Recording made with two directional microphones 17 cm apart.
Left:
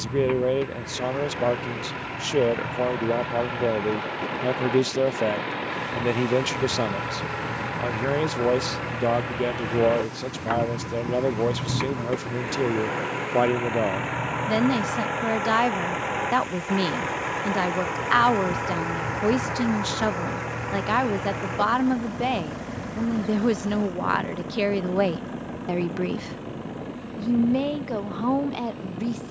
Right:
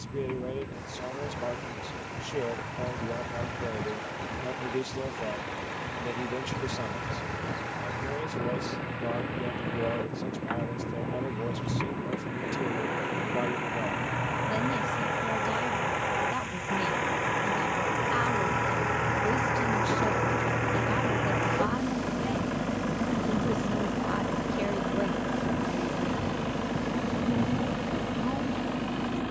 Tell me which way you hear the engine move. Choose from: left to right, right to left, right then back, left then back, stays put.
left to right.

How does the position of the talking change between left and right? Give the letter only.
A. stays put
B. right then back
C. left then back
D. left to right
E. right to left
A.